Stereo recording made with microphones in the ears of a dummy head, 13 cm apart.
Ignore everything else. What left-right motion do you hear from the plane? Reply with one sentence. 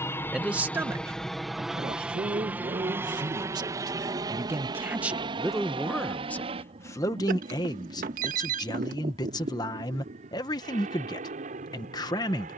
In this clip you hear the plane go from the left side to the right.